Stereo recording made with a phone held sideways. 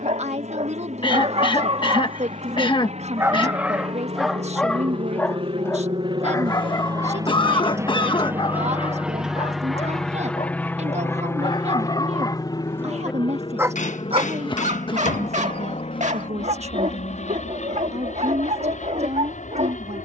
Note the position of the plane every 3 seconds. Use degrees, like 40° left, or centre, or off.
60° right, 50° right, 20° right, 10° left, 30° left, 50° left, 60° left.